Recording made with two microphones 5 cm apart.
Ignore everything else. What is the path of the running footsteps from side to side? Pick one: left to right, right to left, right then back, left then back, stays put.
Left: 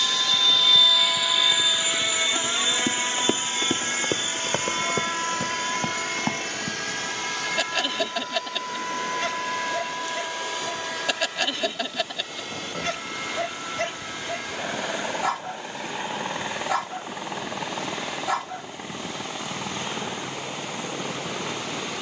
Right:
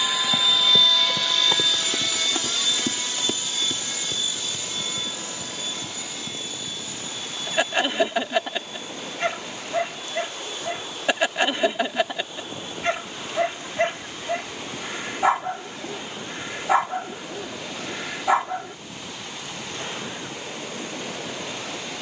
right to left.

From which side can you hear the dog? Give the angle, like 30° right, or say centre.
20° right.